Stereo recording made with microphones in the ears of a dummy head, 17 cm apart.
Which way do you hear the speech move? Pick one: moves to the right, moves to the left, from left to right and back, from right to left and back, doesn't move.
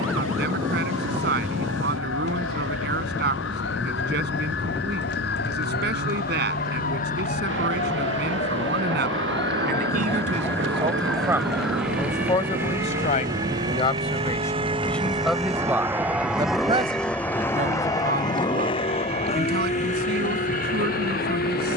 from right to left and back.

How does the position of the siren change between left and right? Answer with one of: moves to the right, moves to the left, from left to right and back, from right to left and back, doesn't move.
moves to the right.